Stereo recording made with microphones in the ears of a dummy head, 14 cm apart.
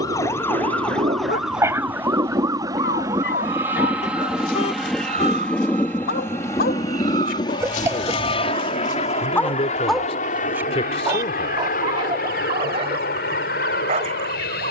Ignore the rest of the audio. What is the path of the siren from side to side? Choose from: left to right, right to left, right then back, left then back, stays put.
left to right.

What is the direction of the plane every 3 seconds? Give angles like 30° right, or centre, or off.
30° right, centre, 30° left, 50° left, 60° left.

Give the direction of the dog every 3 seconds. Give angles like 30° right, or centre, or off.
40° left, 80° left, 50° left, 10° right, 40° right.